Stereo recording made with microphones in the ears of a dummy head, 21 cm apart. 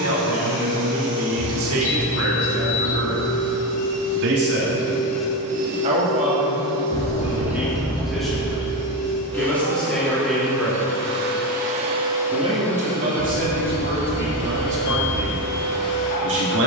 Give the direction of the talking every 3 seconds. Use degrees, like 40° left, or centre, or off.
60° right, 50° right, 10° right, centre, 40° right, 50° right.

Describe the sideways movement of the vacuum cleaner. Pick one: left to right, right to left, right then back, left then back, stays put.
right then back.